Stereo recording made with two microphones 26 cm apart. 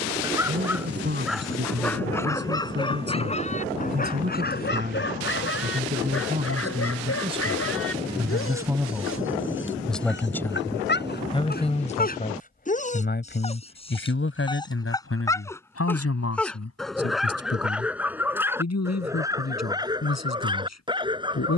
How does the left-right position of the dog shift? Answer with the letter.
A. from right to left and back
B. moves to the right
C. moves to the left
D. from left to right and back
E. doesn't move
A.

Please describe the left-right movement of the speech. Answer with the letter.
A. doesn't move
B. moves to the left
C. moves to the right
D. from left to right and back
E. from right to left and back
B.